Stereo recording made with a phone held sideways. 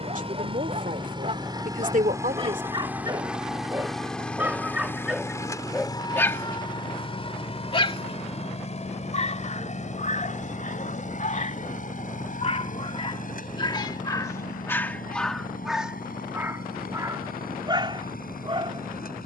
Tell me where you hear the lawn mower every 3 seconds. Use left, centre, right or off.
right, centre, left, left, left, left, left.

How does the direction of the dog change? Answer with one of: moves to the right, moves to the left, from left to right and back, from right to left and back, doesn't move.
from right to left and back.